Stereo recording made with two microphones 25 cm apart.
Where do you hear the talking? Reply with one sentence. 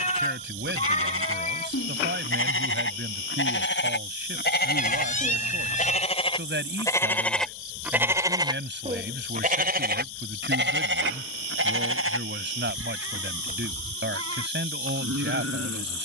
In this clip you hear the talking on the right.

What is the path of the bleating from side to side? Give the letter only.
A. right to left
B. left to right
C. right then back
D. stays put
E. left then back
B.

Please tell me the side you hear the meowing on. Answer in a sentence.
You can hear the meowing on the left.